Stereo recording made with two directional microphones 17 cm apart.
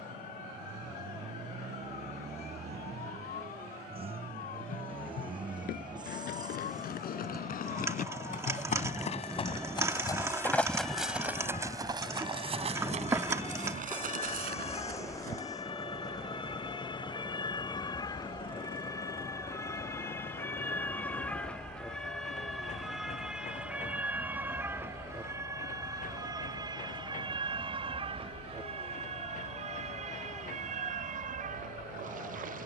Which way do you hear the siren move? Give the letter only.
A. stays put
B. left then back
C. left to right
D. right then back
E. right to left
C.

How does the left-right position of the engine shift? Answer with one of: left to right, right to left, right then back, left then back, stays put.
right to left.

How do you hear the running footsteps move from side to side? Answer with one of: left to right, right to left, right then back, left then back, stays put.
left to right.